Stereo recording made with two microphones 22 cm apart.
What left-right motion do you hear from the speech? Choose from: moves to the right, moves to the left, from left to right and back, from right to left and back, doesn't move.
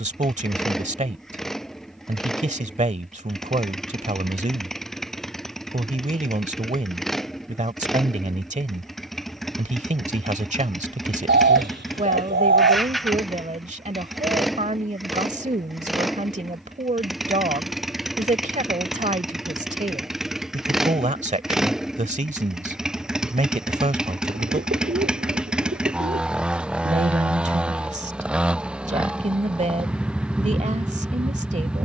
doesn't move.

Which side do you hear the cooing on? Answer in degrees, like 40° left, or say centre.
50° right.